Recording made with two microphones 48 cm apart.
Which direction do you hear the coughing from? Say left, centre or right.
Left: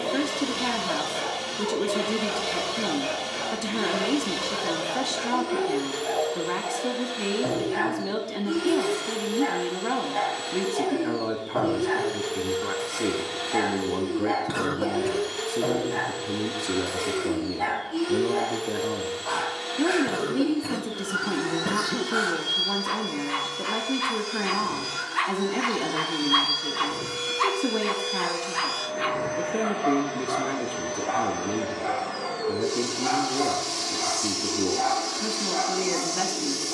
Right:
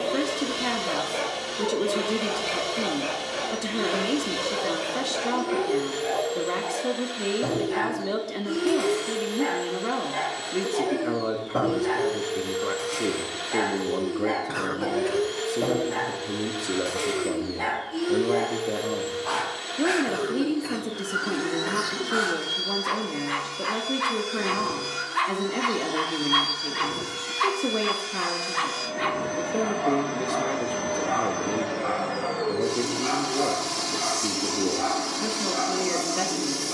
left.